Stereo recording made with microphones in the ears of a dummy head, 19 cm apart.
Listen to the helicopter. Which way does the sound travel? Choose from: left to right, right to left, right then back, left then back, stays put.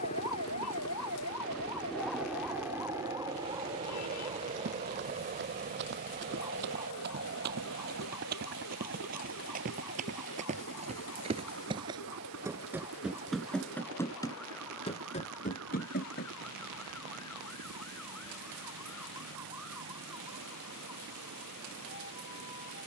left to right.